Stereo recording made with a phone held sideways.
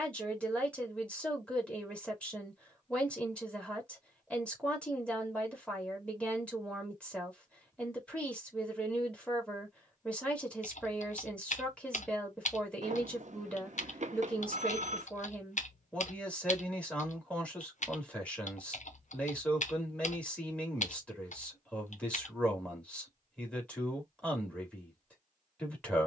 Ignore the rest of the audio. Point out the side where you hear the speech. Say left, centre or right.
centre.